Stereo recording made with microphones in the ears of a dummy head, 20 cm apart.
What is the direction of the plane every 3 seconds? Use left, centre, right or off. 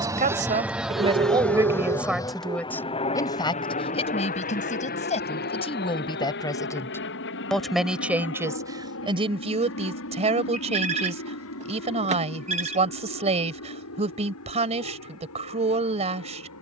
centre, left, left, left, left, left.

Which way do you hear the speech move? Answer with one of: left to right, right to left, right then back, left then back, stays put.
left then back.